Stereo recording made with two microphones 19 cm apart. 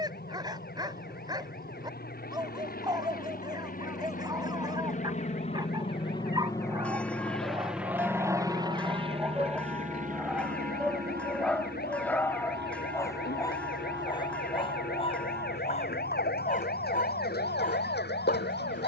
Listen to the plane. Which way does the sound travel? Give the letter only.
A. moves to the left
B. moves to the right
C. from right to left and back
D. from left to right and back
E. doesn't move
B.